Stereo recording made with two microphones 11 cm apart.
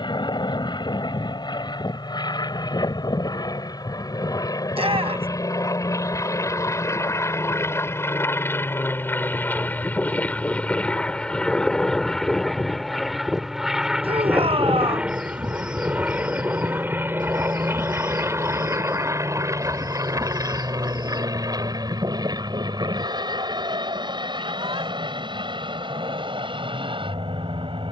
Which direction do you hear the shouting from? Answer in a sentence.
In this clip you hear the shouting on the right.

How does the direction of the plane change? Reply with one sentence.
You can hear the plane move to the right.